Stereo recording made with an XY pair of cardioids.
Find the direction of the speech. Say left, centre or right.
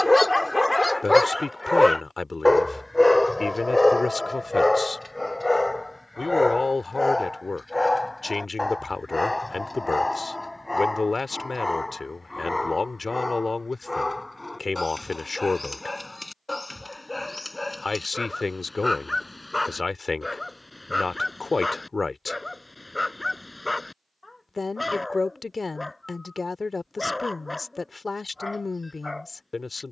left.